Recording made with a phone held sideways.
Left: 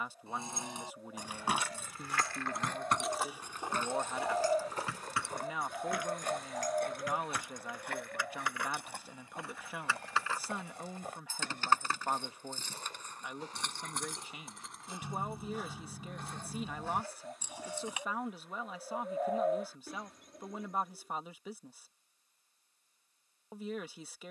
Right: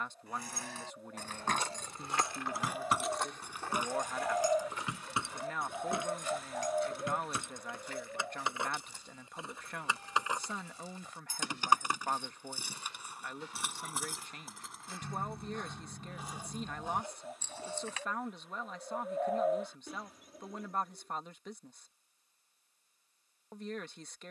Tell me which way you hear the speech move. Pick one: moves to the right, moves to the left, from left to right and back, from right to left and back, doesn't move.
doesn't move.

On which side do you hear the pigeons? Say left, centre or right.
centre.